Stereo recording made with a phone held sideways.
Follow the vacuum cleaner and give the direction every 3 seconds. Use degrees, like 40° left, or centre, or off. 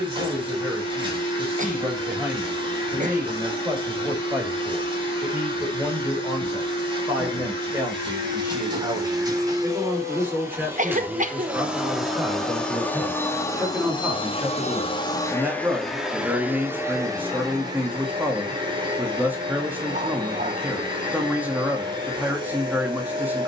30° right, 30° right, 30° right, 10° right, 20° left, 10° right, 30° right, 30° right.